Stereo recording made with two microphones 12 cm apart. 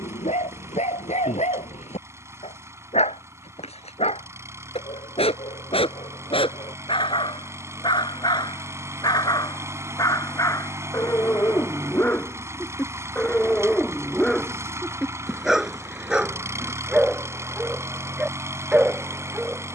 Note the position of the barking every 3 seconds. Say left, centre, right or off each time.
left, left, left, left, centre, centre, centre.